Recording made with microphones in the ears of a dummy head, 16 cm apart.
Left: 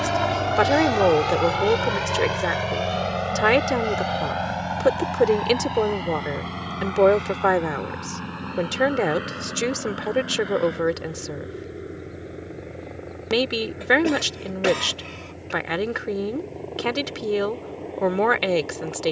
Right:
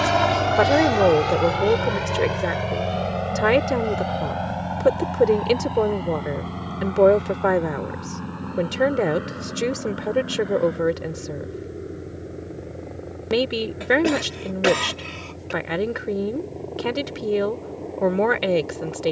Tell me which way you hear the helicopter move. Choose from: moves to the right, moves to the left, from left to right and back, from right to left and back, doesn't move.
moves to the left.